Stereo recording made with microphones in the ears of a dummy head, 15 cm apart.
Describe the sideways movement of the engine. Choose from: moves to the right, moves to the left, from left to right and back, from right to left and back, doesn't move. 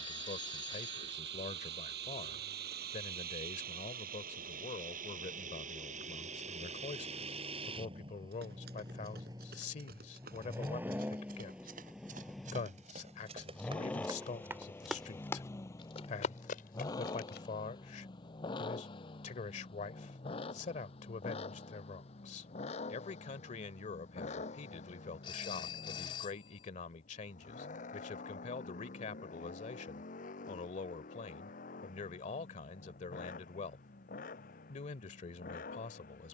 moves to the left.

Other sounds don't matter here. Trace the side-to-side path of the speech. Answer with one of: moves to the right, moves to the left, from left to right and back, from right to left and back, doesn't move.
doesn't move.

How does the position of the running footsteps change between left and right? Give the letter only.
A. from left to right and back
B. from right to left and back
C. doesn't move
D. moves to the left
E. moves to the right
D.